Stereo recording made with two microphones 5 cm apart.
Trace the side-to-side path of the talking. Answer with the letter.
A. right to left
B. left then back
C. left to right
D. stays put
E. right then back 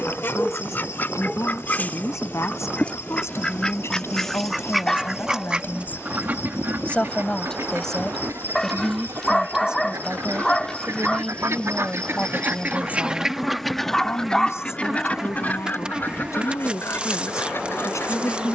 E.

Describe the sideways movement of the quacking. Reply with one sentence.
You can hear the quacking move from left to right and back again.